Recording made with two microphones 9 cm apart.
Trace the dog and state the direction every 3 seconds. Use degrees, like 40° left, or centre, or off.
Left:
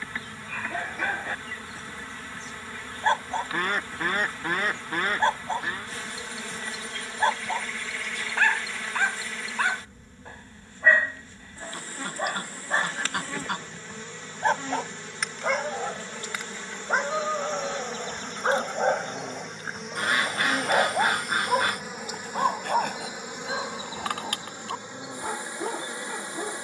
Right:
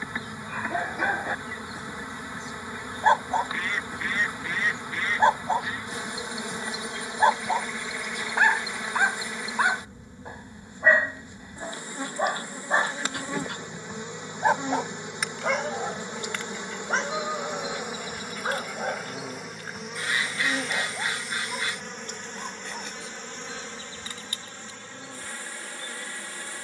20° right, 20° right, 20° right, 20° right, 10° right, 10° left, 30° left, 60° left, 70° left.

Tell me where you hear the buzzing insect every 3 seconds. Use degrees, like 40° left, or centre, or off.
20° right, 20° right, 20° right, 20° right, 20° right, 20° right, centre, 10° left, 20° left.